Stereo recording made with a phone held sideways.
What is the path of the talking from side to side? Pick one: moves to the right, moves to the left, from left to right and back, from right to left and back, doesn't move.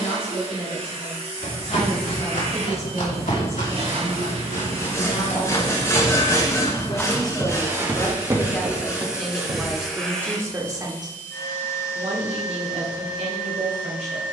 moves to the right.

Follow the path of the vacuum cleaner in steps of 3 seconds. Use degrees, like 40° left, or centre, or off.
50° right, 50° right, 20° right, 10° left, 30° left.